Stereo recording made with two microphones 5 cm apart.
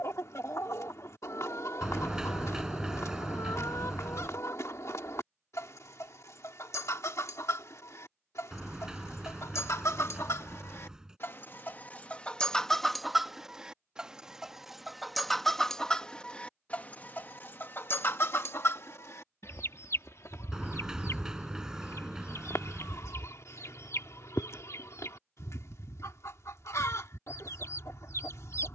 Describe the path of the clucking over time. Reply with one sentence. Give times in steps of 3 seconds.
In this clip you hear the clucking on the left from 0 s, in the centre from 12 s and on the left from 15 s.